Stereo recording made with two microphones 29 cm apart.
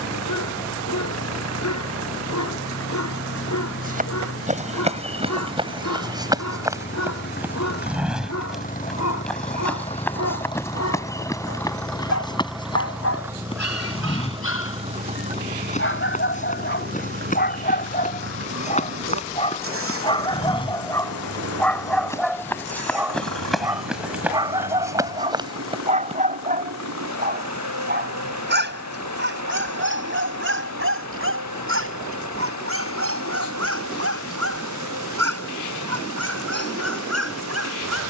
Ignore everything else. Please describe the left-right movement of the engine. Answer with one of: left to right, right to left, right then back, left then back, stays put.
left to right.